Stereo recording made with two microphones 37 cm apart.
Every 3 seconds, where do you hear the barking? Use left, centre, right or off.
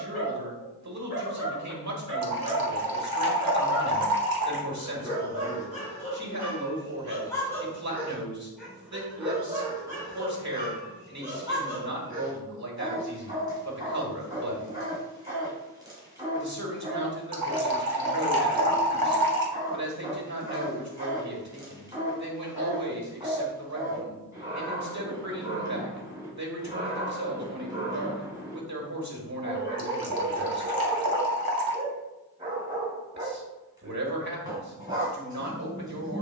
left, left, centre, centre, centre, centre, centre, centre, centre, centre, centre, centre.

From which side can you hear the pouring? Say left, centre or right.
right.